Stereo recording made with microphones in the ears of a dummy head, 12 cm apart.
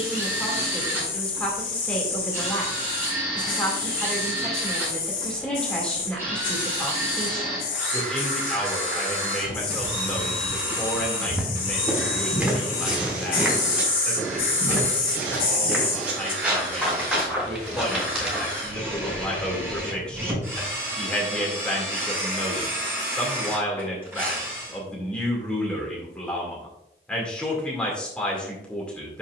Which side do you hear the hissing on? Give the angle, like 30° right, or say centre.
70° left.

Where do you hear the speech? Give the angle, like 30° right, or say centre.
10° left.